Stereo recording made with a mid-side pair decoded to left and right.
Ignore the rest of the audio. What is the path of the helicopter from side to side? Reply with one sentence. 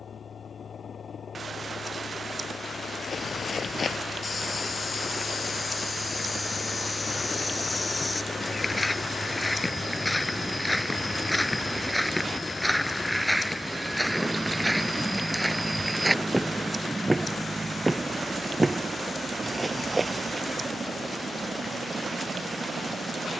You can hear the helicopter move to the right.